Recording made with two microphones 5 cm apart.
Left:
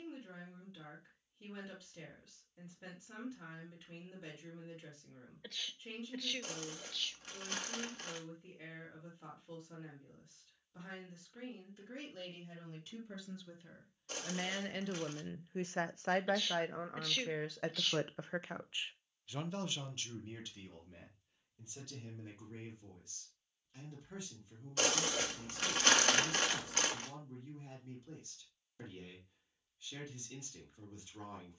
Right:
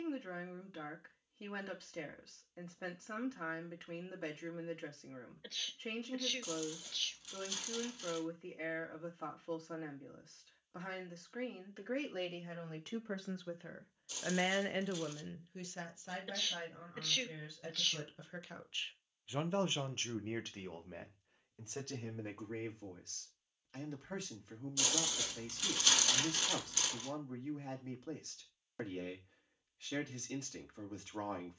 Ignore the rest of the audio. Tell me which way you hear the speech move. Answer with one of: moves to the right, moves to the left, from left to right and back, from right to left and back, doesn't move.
from right to left and back.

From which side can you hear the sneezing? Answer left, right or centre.
centre.